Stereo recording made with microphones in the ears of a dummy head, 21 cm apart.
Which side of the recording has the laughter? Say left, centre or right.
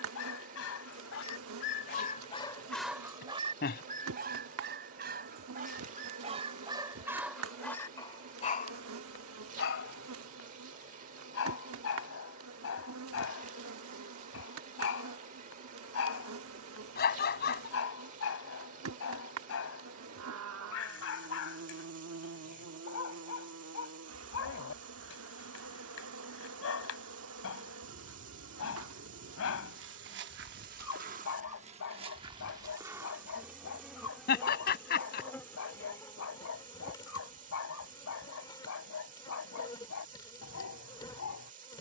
left.